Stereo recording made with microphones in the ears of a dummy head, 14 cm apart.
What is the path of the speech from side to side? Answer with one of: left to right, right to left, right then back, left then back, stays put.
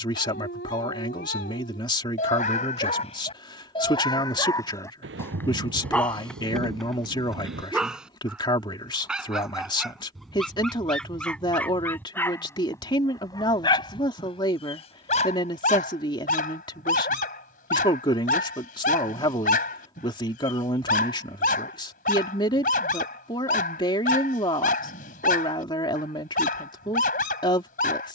stays put.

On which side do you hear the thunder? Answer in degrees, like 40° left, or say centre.
80° right.